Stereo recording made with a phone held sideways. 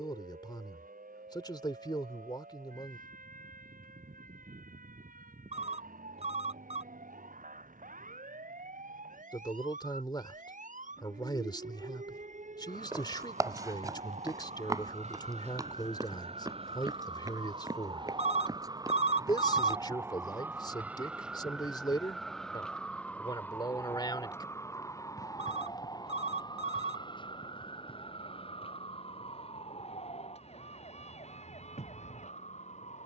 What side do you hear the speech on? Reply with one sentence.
You can hear the speech on the left.